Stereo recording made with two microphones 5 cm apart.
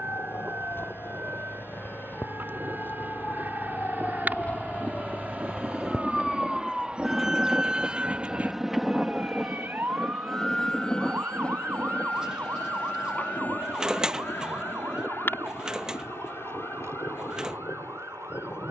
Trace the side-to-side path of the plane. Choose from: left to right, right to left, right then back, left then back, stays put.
right to left.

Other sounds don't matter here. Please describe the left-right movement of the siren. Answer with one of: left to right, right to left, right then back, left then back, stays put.
left to right.